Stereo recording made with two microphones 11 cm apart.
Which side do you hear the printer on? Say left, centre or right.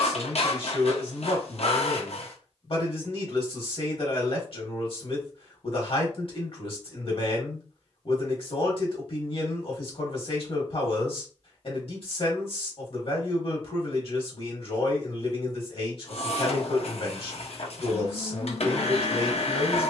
left.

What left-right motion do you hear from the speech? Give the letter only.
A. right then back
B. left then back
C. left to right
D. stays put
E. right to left
D.